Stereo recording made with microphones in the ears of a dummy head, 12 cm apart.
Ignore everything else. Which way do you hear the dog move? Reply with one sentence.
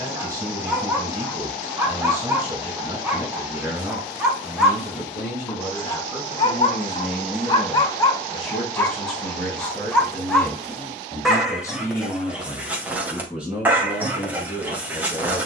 In this clip you hear the dog move from right to left and back again.